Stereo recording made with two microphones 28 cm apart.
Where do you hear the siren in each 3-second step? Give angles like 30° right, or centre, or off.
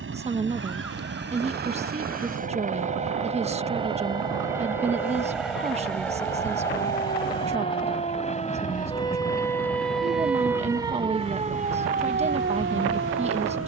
60° left, 50° left, 30° left, 10° right, 40° right.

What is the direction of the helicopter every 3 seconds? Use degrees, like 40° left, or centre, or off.
40° right, 10° right, 20° left, 40° left, 40° left.